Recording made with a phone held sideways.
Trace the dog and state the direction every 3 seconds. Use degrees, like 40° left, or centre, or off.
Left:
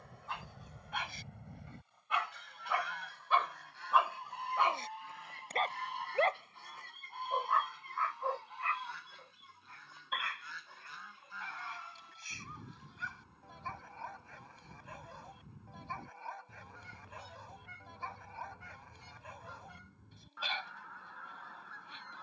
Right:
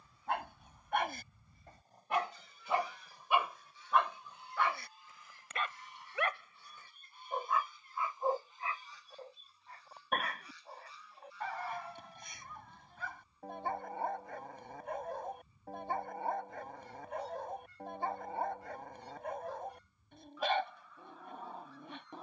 40° right, 20° left, centre, 50° right, 50° right, 50° right, 50° right, 50° right.